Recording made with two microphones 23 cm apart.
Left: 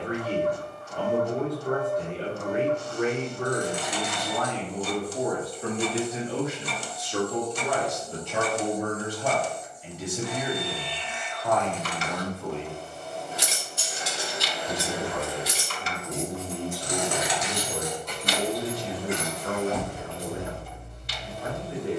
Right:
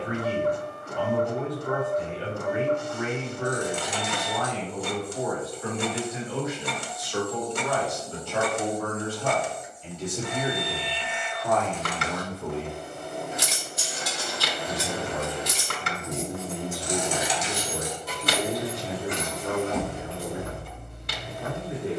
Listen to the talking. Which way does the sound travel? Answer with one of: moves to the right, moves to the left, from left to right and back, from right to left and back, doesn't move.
moves to the right.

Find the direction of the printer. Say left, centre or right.
right.